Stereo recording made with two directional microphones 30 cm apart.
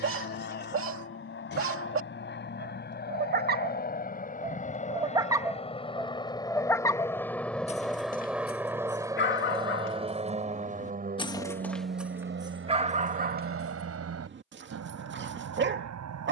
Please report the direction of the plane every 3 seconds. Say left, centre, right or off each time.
left, left, centre, right, right, right.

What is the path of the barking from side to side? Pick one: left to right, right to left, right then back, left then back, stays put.
left then back.